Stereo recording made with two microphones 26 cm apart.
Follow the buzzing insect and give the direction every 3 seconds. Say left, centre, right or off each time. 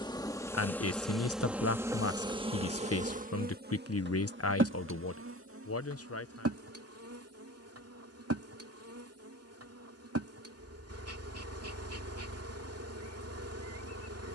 centre, right, right, right, right.